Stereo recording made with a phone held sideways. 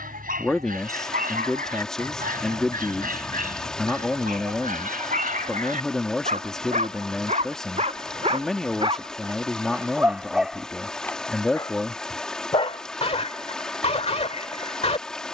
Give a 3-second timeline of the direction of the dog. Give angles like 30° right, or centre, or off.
80° right, 70° right, 50° right, centre, 40° left.